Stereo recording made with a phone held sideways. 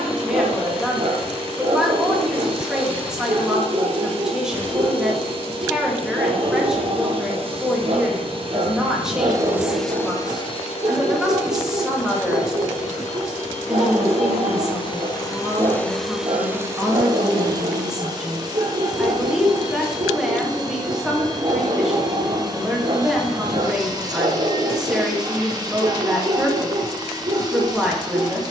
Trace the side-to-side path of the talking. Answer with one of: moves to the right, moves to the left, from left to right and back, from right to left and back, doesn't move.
doesn't move.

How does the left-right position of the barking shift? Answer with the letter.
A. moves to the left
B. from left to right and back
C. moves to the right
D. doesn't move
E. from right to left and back
D.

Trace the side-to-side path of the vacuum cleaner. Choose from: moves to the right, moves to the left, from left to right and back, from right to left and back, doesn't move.
from right to left and back.